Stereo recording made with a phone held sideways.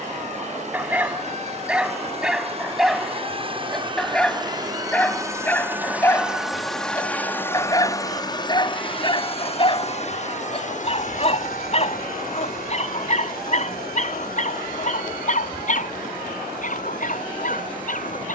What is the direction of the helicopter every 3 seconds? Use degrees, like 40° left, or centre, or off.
50° right, 30° right, 10° left, 50° left, 70° left, 70° left.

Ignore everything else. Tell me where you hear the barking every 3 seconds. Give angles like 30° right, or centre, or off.
10° right, 10° left, 20° left, 40° left, 50° left, 60° left.